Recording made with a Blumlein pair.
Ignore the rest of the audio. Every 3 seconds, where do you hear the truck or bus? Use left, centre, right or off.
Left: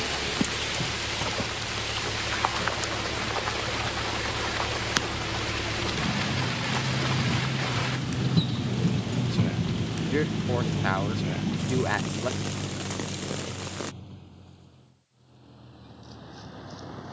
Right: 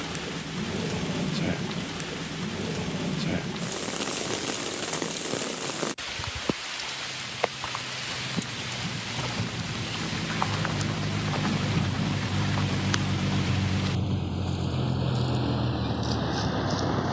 left, left, left, centre, right, right.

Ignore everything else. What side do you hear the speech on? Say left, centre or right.
left.